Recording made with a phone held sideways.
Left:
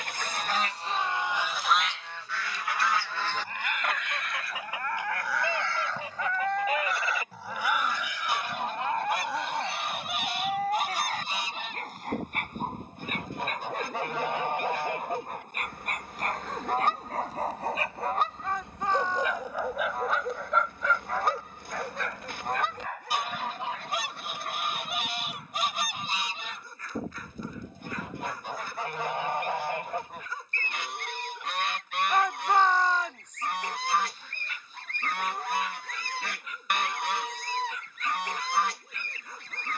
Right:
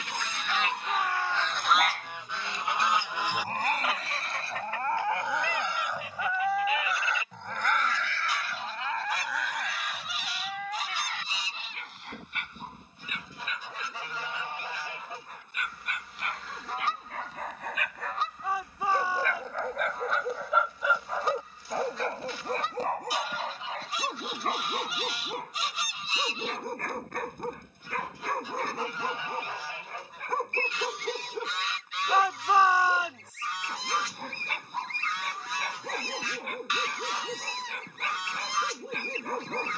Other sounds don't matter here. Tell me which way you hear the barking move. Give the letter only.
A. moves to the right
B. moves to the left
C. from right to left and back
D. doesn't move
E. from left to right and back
C.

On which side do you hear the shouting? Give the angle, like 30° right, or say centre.
10° right.